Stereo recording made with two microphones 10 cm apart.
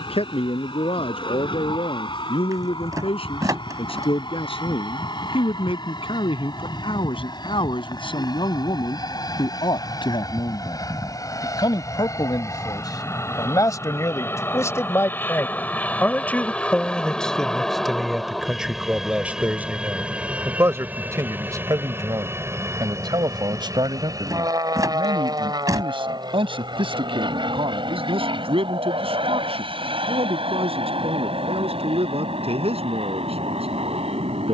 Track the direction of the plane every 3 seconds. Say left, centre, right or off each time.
left, left, left, left, left, centre, centre, right, right, right, right, right.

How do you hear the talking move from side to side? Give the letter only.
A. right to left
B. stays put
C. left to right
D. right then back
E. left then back
C.